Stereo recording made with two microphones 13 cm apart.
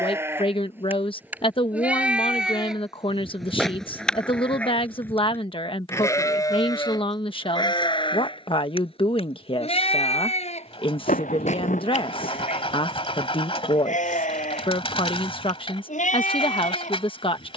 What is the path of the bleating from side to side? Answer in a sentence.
In this clip you hear the bleating move to the left.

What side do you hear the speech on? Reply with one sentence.
In this clip you hear the speech on the left.